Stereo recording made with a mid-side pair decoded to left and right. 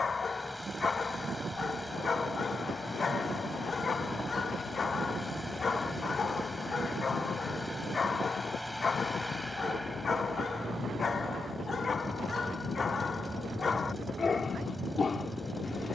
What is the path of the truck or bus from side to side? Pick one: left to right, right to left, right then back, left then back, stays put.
stays put.